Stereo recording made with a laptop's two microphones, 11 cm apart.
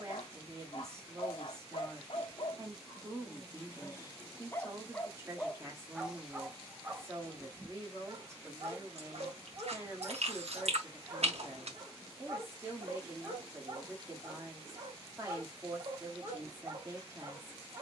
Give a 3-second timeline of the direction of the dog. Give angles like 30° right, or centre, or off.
50° left, 20° left, 20° right, 40° right, 40° right, 40° right.